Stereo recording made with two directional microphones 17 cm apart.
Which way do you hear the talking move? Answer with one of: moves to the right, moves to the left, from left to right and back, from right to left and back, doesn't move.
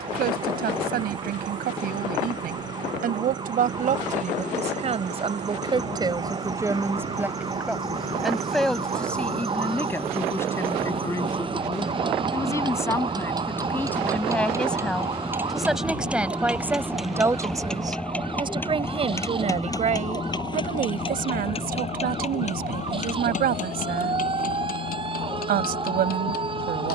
from right to left and back.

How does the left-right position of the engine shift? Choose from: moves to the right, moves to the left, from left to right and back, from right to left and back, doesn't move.
moves to the left.